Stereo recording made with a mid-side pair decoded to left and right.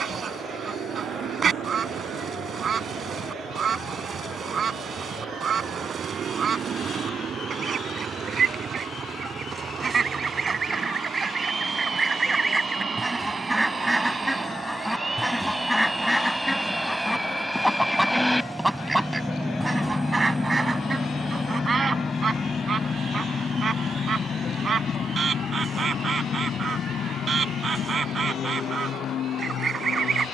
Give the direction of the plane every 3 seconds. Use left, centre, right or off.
right, right, right, right, right, centre, centre, left, left, left.